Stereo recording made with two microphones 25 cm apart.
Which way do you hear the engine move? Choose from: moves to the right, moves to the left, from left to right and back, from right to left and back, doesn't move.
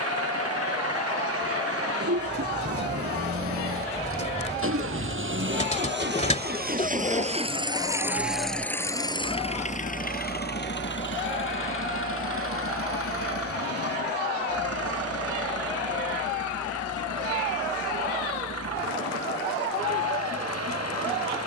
moves to the left.